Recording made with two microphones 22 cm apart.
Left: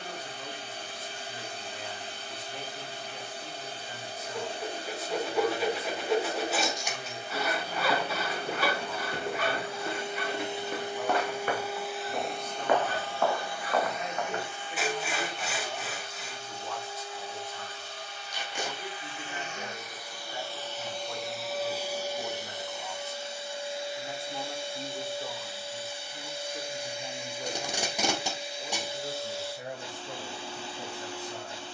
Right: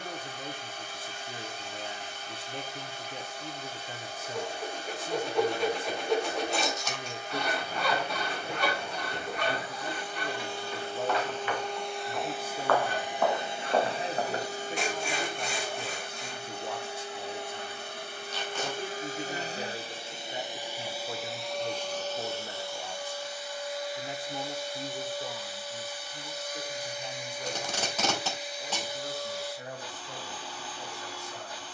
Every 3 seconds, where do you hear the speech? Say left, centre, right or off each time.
right, right, right, right, right, right, right, right, centre, left, left.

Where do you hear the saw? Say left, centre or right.
centre.